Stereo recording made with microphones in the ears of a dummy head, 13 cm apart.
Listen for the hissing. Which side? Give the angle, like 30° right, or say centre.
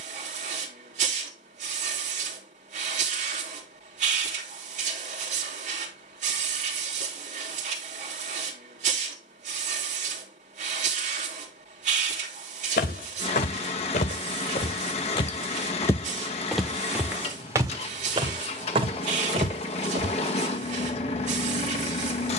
50° right.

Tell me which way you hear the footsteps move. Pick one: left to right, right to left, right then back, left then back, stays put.
left to right.